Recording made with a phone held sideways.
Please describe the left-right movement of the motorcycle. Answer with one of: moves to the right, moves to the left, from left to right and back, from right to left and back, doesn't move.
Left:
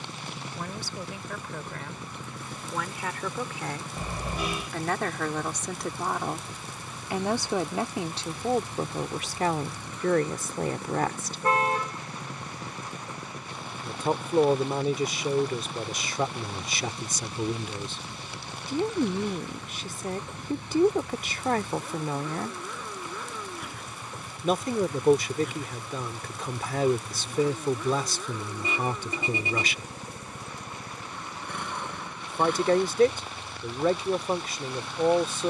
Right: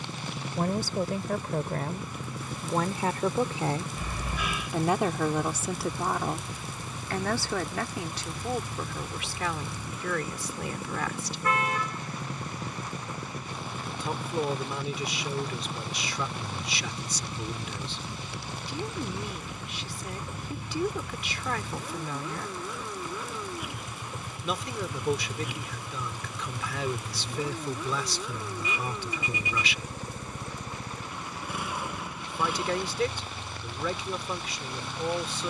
doesn't move.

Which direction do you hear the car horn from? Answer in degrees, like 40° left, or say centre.
30° left.